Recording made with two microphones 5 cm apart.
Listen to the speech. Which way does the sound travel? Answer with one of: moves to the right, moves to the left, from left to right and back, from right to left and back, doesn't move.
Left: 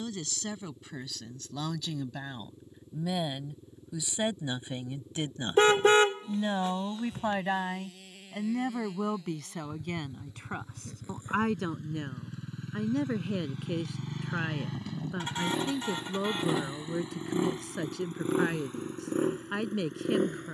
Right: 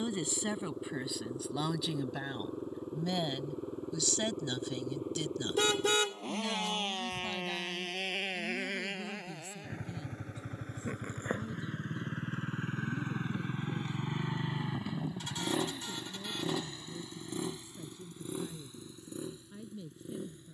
moves to the left.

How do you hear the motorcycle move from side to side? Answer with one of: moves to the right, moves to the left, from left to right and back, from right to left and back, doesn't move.
moves to the left.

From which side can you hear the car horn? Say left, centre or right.
left.